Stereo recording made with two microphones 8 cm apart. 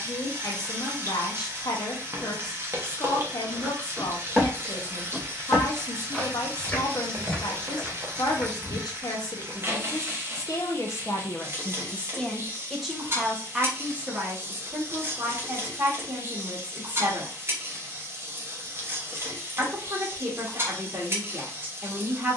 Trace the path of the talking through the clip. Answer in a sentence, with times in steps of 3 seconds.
In this clip you hear the talking on the left from 0 s, in the centre from 12 s and on the right from 15 s.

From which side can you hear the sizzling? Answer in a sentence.
In this clip you hear the sizzling on the right.